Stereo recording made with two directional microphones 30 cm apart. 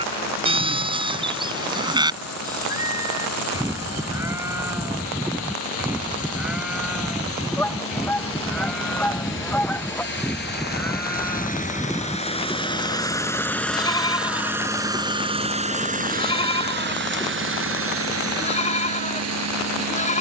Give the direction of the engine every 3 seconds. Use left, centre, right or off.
left, left, left, left, centre, right, right.